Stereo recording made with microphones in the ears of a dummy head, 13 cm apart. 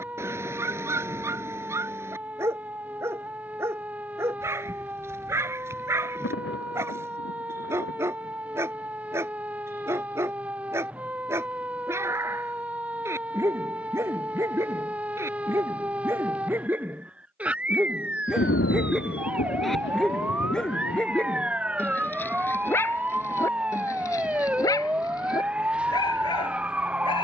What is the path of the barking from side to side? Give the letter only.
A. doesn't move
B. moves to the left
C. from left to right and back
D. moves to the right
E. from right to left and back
B.